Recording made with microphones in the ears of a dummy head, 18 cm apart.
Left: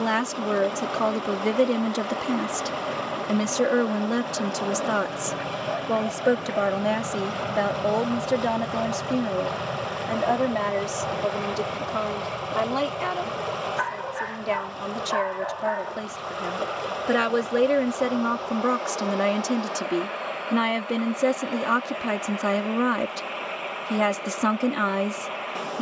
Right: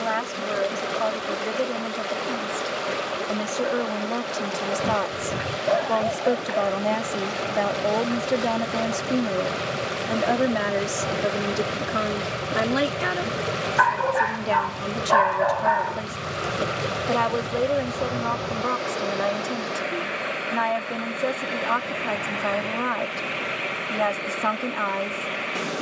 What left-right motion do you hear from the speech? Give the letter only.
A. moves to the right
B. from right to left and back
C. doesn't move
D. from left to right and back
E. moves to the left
D.